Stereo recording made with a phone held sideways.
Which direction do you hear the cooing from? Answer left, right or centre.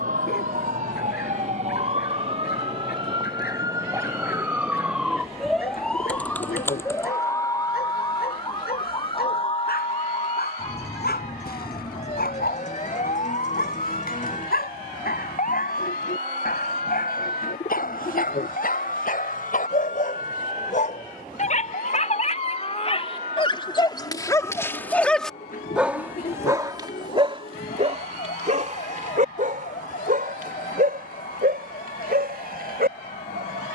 left.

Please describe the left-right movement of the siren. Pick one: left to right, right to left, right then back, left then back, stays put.
right to left.